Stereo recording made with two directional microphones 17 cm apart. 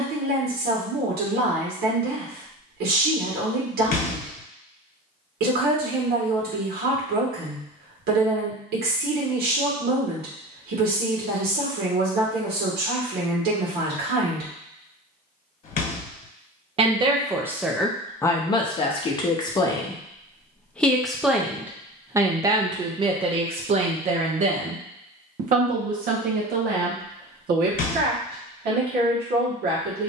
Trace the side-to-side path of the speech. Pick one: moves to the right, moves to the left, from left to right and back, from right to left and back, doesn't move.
from right to left and back.